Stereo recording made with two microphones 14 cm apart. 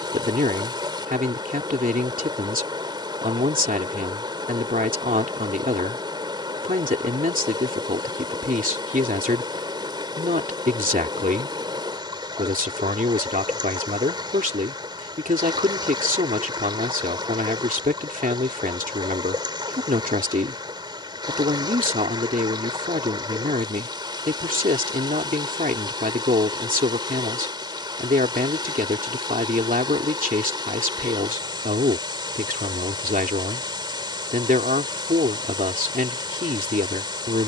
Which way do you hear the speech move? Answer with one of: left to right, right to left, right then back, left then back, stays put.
stays put.